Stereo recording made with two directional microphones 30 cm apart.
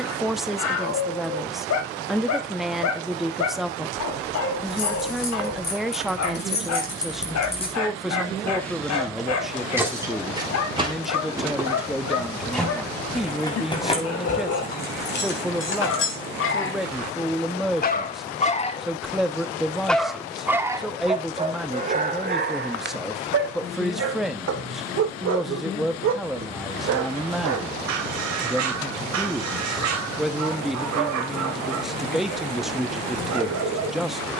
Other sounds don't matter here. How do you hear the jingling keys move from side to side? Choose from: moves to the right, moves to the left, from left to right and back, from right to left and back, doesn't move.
from left to right and back.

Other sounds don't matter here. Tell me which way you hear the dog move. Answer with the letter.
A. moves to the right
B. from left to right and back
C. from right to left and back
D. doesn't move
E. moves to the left
A.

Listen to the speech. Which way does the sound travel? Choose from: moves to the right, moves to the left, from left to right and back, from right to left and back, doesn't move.
doesn't move.